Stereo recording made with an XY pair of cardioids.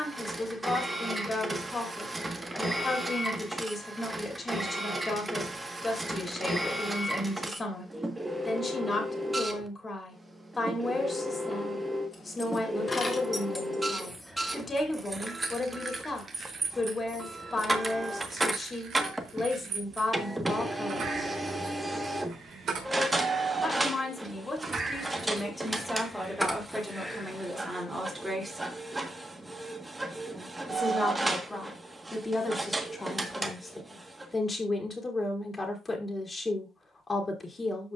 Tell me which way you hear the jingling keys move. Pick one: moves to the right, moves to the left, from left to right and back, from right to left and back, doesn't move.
from left to right and back.